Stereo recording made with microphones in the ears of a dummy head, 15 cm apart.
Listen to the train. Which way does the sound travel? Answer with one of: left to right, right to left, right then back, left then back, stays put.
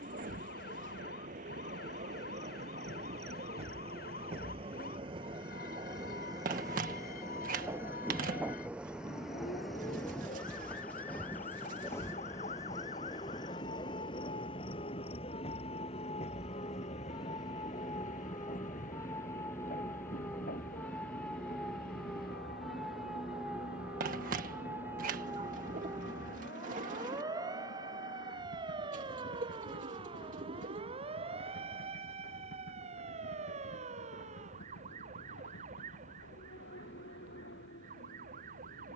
right to left.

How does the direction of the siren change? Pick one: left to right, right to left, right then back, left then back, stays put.
left to right.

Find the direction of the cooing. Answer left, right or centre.
right.